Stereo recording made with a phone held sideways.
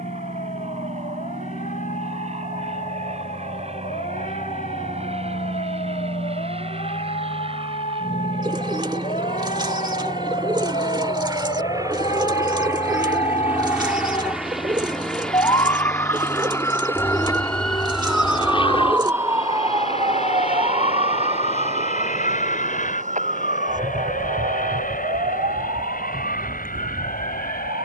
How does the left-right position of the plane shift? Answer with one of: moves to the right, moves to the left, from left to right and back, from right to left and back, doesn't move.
moves to the left.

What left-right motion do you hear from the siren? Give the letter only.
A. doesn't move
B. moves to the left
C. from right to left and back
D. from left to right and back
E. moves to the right
E.